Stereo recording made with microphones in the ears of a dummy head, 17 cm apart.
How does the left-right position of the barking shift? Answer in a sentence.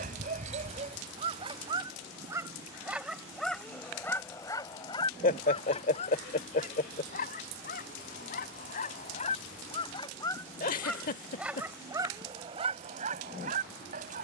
You can hear the barking move from right to left and back again.